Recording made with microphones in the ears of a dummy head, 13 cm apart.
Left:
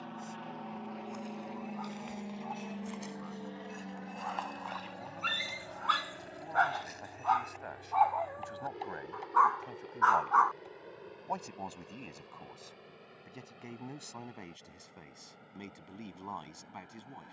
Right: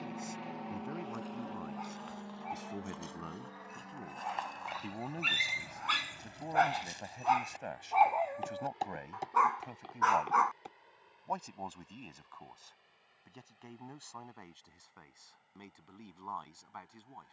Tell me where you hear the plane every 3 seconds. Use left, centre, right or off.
centre, left, left, left, left, left.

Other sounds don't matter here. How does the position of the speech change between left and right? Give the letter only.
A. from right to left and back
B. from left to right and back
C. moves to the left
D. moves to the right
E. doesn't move
C.